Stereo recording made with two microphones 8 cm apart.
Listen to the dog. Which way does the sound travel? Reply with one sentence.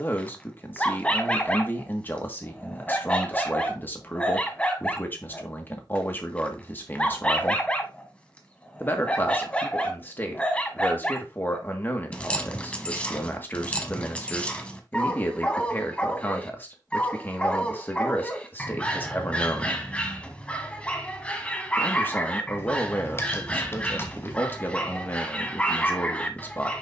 In this clip you hear the dog stay in one place.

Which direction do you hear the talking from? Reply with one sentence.
In this clip you hear the talking on the left.